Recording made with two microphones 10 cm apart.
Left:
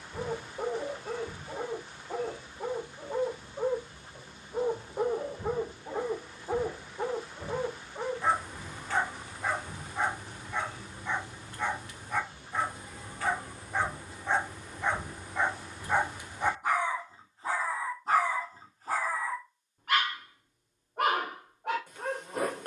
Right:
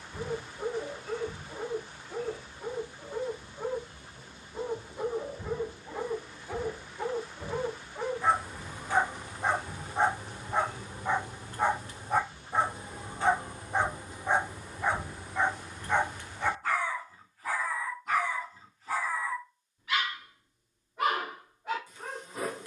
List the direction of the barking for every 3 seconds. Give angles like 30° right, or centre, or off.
70° left, 60° left, 10° left, 30° right, 20° right, 10° left, 50° left, 60° left.